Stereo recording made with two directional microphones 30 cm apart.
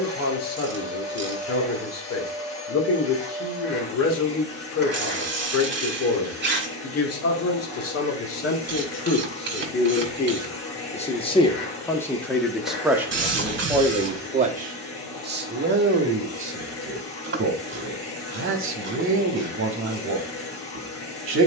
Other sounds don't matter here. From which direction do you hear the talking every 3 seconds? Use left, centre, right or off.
left, left, left, left, centre, right, right.